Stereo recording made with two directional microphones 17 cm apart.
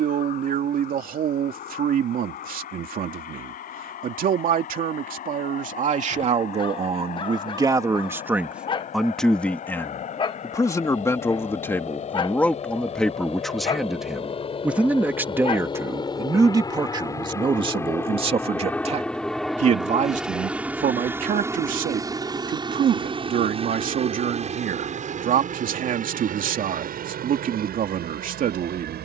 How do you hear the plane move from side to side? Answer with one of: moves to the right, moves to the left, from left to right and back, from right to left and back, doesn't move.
moves to the right.